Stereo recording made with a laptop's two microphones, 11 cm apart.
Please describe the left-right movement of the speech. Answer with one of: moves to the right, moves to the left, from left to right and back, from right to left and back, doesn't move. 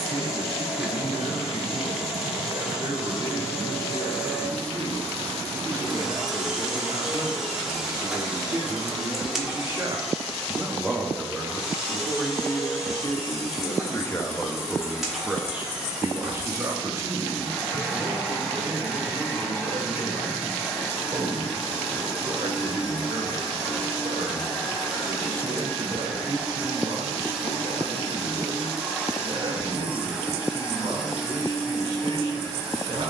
from right to left and back.